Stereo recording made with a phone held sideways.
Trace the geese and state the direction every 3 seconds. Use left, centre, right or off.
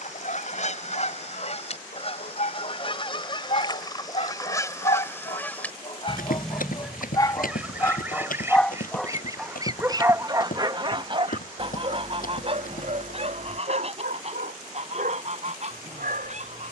left, left, centre, right, right, right.